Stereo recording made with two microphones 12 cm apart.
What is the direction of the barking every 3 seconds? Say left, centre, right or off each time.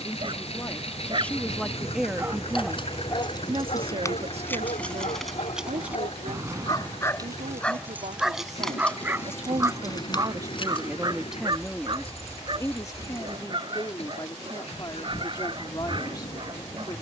right, left, centre, right, right, right.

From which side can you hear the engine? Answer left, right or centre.
left.